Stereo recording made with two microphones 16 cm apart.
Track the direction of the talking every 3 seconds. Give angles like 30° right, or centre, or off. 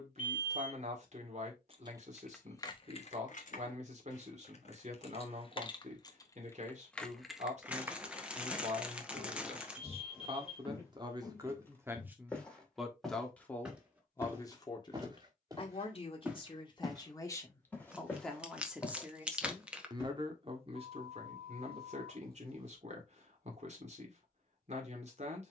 50° right, 50° right, 50° right, 30° right, 10° left, 30° left, 20° right, 50° right, 50° right.